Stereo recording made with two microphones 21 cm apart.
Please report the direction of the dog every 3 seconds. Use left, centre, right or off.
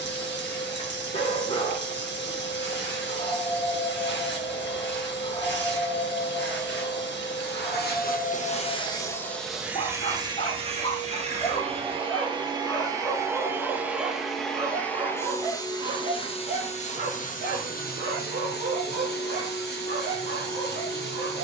left, left, left, left, centre, right, right.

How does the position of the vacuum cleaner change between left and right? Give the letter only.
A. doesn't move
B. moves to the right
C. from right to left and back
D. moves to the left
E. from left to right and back
E.